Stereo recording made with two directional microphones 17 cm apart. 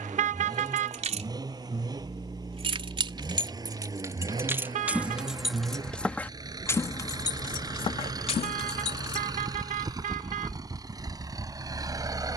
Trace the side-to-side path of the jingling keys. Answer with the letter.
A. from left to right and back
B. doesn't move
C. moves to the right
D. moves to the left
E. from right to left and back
D.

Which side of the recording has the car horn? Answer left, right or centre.
right.